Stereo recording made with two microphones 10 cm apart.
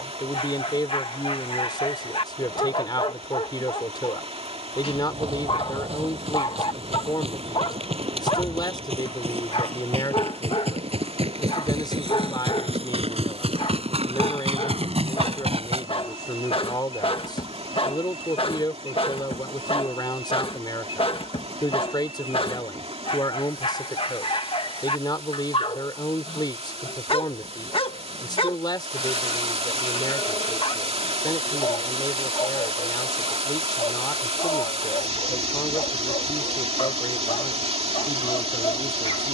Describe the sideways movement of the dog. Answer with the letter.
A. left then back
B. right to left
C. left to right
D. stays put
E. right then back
D.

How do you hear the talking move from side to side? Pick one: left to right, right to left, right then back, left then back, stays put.
stays put.